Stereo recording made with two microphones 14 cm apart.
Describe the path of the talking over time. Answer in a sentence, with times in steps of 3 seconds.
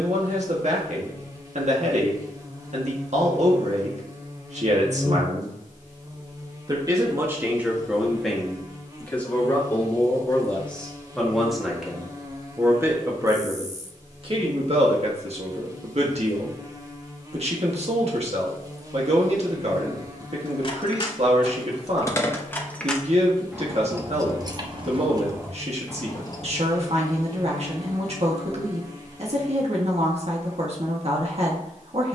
In this clip you hear the talking on the right from 0 s, in the centre from 6 s and on the right from 12 s.